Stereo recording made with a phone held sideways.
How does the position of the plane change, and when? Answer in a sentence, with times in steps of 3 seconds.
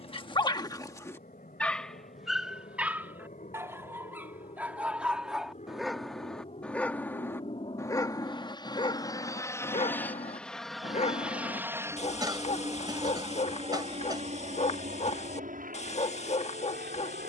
You can hear the plane on the left from 0 s, in the centre from 9 s and on the right from 12 s.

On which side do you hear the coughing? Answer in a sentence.
You can hear the coughing on the right.